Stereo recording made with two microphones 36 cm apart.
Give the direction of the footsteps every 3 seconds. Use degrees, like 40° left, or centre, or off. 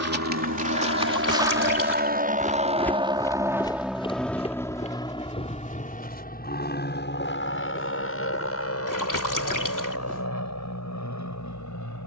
10° right, 20° left, 20° left, 10° right.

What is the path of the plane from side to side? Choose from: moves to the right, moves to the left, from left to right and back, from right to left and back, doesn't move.
moves to the left.